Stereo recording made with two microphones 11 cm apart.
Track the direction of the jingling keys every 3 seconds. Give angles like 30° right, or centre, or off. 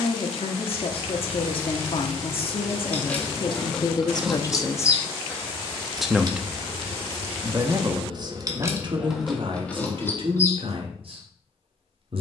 20° left, 10° right, 50° right, 10° left.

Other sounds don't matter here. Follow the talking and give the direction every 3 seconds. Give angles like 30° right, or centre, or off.
60° left, 40° left, 30° right, 60° right.